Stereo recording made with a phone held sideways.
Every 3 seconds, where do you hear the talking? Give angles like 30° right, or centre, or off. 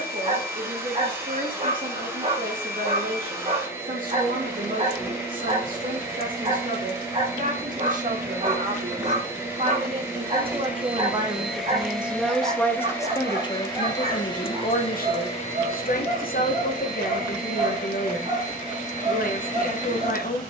60° right, 60° right, 50° right, 30° right, 30° left, 60° left, 60° left.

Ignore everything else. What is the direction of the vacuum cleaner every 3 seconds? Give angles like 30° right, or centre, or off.
20° right, 20° right, 20° right, 10° right, 20° left, 50° left, 50° left.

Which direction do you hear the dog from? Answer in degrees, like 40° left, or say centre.
40° right.